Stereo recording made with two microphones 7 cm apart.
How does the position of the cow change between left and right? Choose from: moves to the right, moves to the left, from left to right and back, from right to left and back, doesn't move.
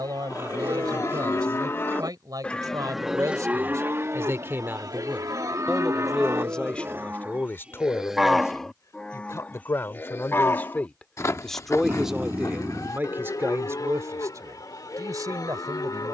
from left to right and back.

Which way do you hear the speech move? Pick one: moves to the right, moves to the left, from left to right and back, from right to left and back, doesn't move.
from right to left and back.